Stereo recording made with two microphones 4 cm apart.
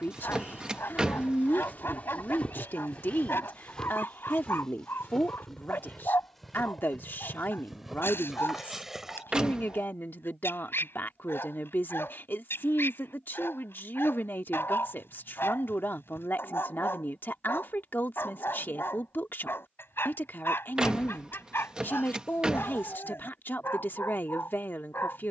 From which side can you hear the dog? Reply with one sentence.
In this clip you hear the dog on the left.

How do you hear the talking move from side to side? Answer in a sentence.
In this clip you hear the talking stay in one place.